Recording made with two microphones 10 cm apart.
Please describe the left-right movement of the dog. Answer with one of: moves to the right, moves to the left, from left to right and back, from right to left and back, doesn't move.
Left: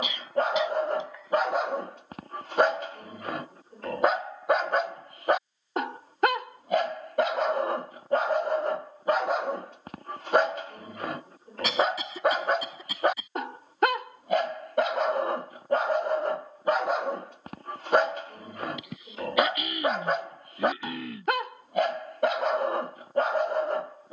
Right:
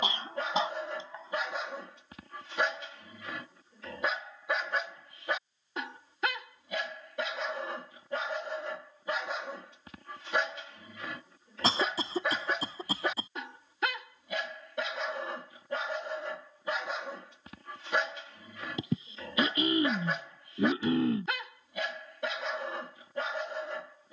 doesn't move.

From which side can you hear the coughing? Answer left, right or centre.
right.